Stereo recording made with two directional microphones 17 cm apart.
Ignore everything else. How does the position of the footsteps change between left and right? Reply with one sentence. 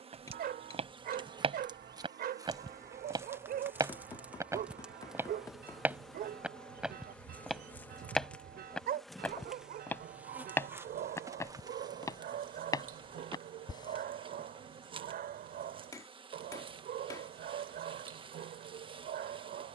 You can hear the footsteps travel towards the left.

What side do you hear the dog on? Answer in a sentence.
You can hear the dog on the right.